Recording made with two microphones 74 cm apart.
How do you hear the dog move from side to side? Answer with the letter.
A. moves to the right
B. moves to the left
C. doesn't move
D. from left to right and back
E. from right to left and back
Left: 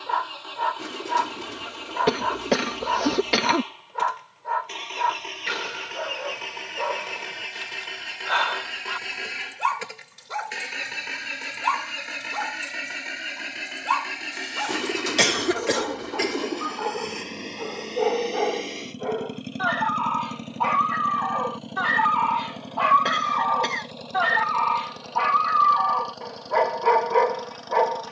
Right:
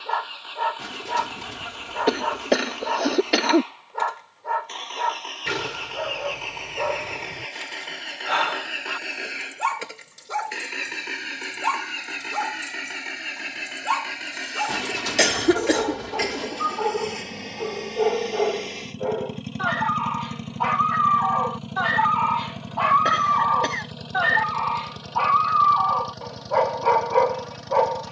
B.